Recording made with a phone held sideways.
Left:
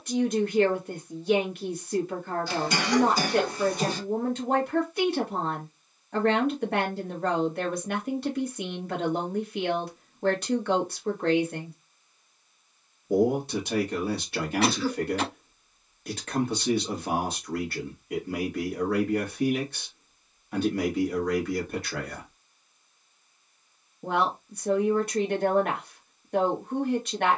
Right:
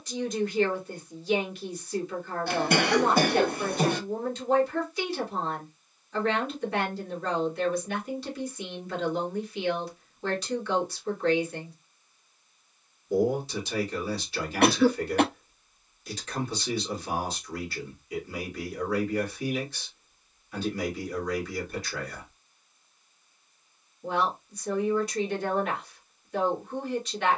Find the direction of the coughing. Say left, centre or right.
right.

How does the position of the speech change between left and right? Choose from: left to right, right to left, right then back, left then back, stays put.
stays put.